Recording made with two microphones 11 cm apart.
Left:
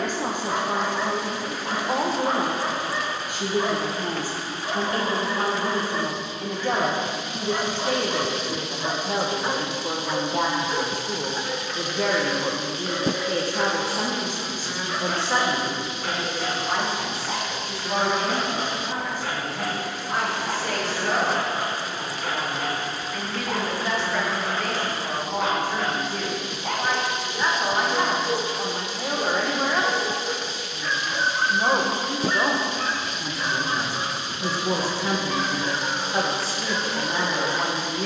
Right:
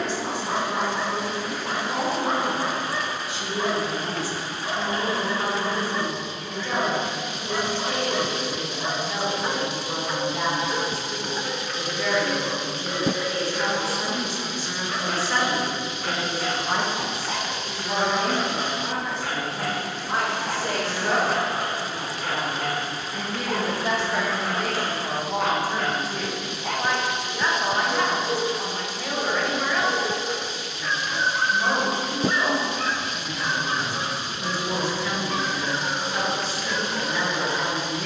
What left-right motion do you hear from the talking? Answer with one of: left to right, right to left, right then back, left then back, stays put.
right then back.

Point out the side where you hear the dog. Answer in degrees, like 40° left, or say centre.
centre.